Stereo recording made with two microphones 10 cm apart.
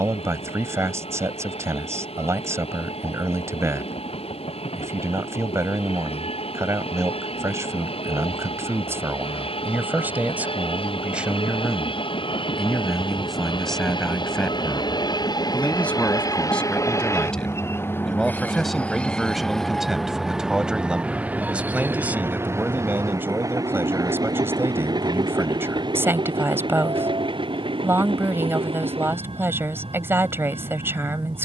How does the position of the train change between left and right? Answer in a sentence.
In this clip you hear the train move from left to right.